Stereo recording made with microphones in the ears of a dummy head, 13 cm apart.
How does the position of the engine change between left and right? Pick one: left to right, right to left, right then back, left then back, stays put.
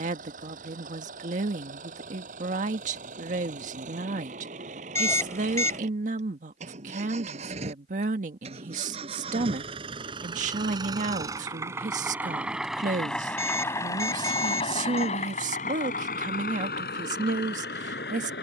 right to left.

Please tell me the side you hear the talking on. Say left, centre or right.
right.